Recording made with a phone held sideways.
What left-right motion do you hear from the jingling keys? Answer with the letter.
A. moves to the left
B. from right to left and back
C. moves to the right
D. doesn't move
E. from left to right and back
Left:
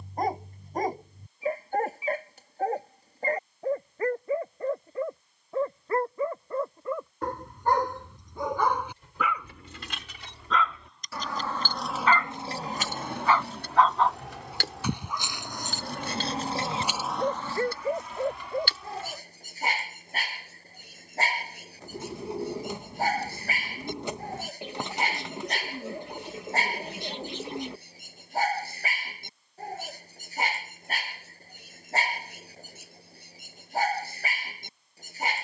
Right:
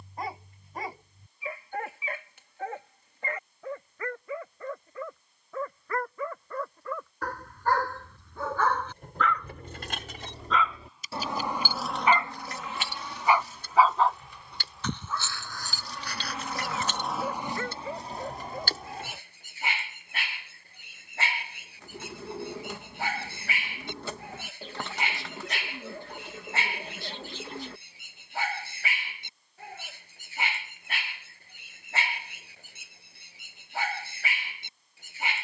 B.